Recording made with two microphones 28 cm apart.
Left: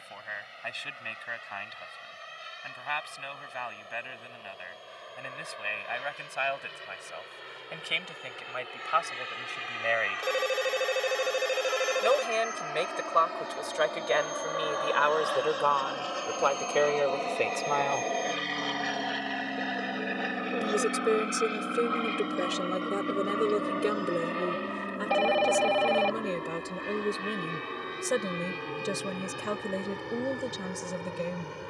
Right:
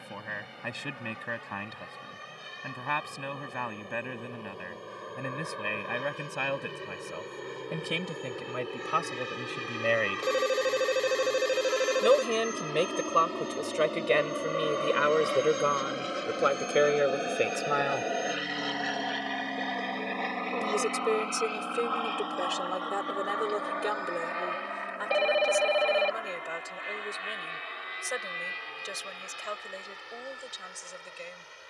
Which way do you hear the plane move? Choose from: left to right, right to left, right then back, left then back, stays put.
right to left.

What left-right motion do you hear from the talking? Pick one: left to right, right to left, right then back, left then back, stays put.
right to left.